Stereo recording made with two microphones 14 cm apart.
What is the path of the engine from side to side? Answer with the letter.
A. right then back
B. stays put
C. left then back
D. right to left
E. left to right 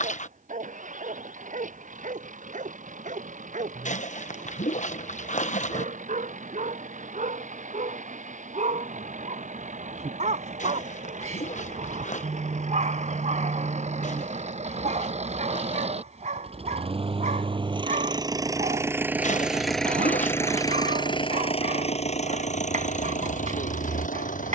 D.